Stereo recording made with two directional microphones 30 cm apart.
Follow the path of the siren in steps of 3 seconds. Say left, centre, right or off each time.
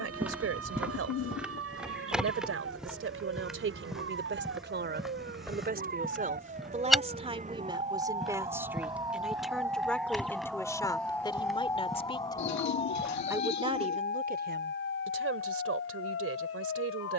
right, right, right, centre, left, left.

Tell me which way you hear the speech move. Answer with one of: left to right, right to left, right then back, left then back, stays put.
left then back.